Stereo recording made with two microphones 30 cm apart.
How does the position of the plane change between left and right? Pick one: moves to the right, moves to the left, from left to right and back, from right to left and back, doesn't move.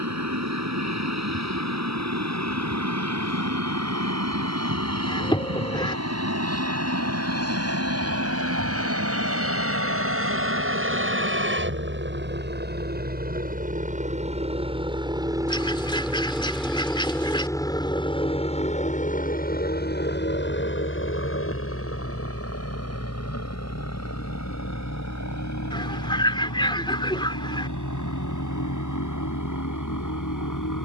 moves to the left.